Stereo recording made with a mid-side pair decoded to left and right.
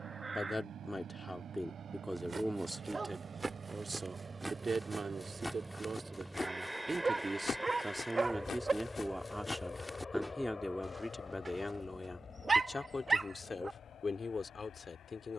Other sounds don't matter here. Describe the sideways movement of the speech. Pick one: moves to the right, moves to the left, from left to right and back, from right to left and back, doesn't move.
from left to right and back.